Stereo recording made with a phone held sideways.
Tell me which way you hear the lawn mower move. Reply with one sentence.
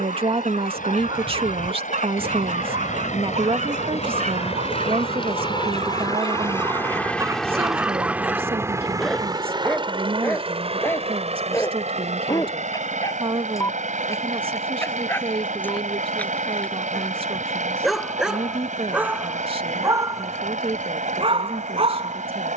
In this clip you hear the lawn mower travel towards the right.